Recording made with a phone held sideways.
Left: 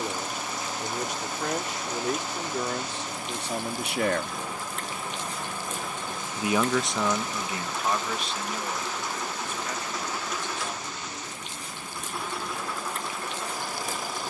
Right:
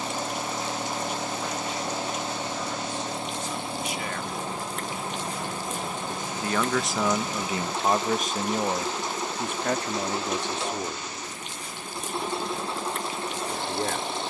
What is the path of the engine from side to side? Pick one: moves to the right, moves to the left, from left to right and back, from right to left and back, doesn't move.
doesn't move.